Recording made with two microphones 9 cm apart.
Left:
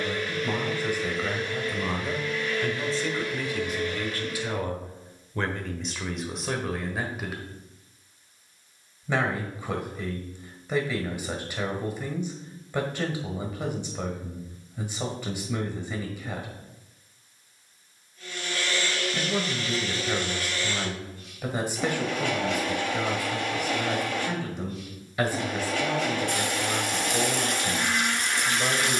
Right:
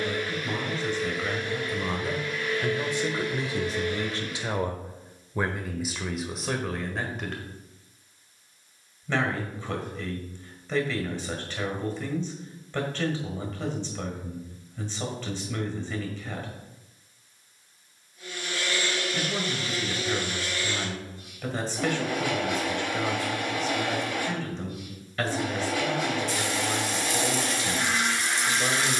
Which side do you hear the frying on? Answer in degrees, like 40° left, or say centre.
60° left.